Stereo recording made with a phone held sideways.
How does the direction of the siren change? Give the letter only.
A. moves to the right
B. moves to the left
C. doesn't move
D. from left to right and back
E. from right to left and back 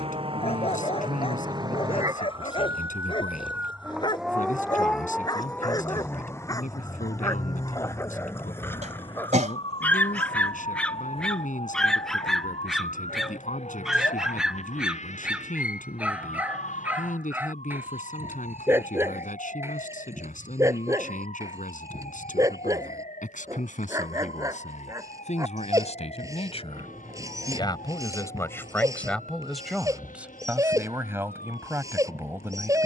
B.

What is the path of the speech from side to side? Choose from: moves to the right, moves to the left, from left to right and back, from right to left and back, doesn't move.
moves to the right.